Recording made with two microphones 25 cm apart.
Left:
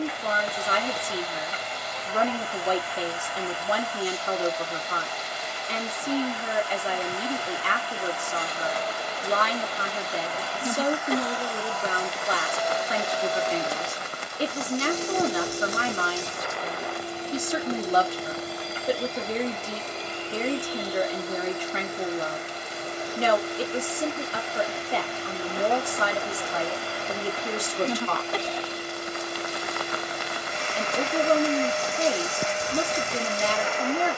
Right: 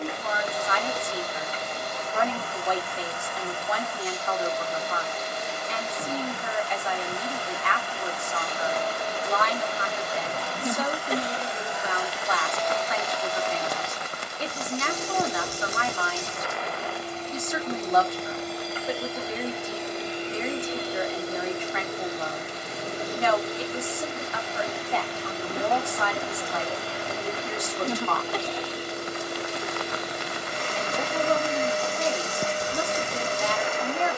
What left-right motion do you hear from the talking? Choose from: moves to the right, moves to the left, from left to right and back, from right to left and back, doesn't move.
doesn't move.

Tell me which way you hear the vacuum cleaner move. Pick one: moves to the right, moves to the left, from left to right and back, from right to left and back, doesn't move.
from right to left and back.